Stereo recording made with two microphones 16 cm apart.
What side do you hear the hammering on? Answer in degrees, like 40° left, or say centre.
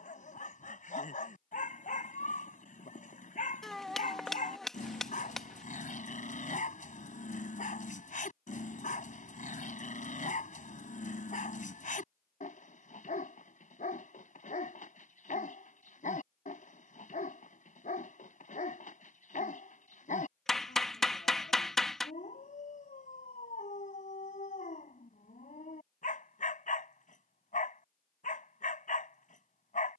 centre.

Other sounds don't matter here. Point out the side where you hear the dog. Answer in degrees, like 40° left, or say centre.
60° left.